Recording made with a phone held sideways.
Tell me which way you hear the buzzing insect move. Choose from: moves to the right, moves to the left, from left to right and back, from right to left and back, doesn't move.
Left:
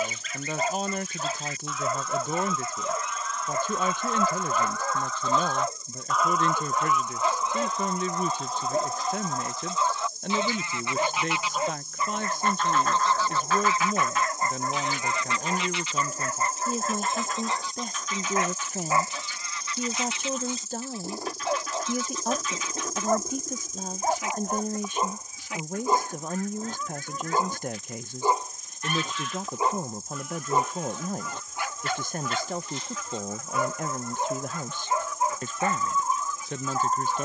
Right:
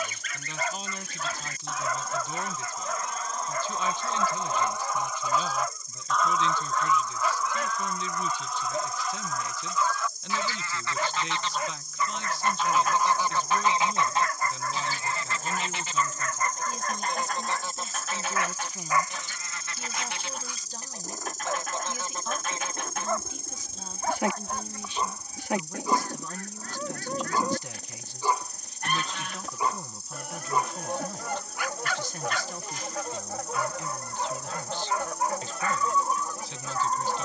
moves to the right.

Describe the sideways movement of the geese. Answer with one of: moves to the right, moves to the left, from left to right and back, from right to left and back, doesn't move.
from right to left and back.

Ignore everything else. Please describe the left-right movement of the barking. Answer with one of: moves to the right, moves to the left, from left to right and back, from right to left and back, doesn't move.
doesn't move.